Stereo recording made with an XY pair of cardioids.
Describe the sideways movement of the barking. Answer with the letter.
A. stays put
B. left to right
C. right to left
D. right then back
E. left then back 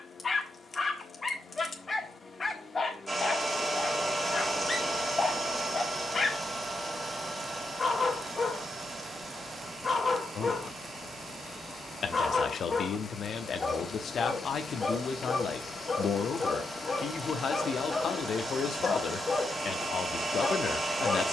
A.